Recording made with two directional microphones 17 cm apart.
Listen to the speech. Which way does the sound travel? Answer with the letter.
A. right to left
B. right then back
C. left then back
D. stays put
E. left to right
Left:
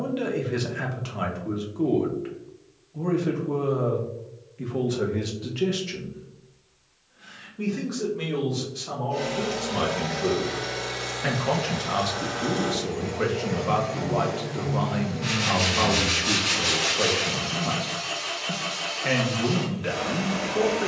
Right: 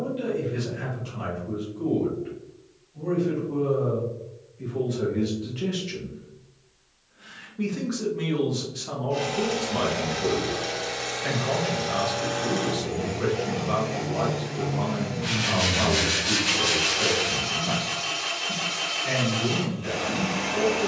B.